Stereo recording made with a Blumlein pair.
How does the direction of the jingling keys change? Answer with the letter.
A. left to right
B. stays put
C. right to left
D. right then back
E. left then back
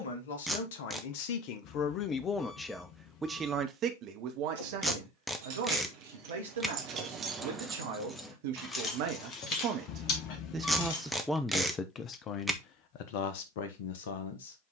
C.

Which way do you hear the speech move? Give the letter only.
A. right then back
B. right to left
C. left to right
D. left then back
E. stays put
A.